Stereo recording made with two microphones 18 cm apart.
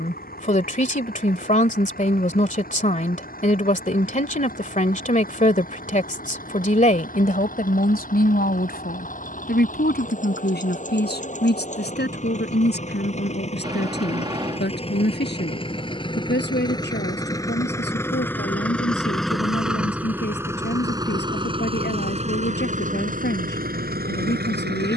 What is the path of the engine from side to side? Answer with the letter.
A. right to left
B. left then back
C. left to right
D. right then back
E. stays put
C.